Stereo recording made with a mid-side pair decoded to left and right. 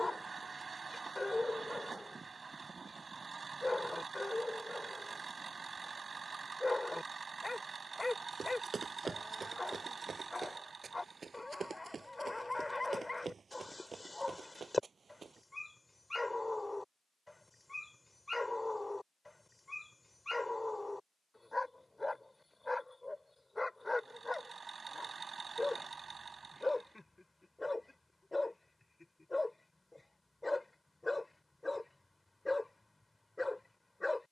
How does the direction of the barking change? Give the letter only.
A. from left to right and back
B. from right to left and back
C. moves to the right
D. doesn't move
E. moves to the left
D.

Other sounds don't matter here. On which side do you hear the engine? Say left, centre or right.
right.